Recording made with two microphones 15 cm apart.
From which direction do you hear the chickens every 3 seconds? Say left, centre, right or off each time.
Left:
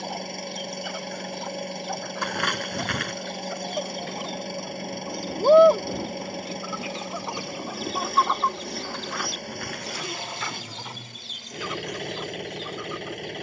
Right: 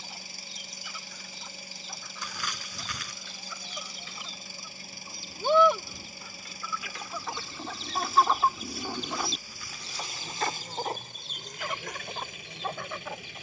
left, left, centre, right, right.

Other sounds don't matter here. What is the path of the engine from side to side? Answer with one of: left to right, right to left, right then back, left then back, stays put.
stays put.